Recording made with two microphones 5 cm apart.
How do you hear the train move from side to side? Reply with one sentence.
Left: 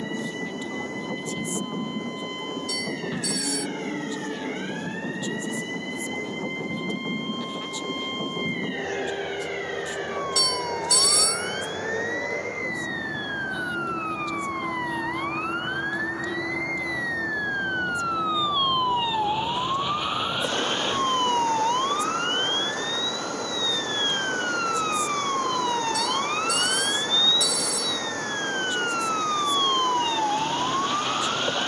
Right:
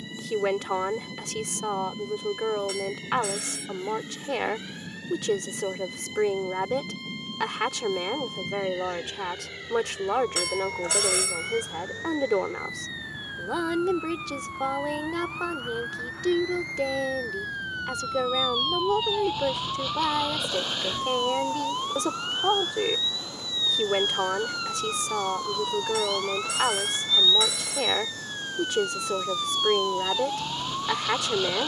In this clip you hear the train stay put.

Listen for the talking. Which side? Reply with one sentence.
In this clip you hear the talking on the right.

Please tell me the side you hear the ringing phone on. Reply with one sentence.
In this clip you hear the ringing phone on the right.